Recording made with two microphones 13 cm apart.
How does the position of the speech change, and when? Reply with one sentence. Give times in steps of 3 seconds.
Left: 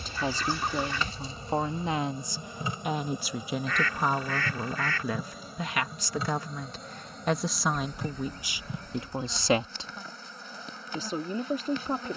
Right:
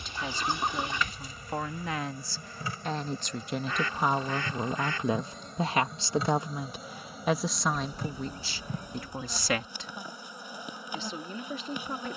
In this clip you hear the speech on the left from 0 s, in the centre from 3 s and on the left from 9 s.